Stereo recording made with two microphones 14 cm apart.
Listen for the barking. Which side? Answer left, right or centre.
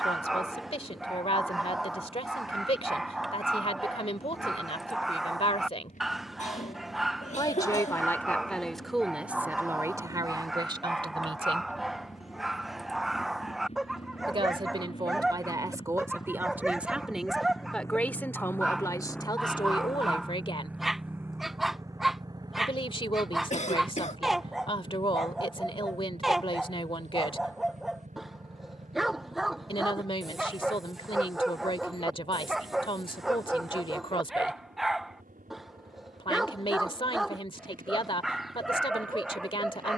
centre.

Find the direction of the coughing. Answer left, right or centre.
left.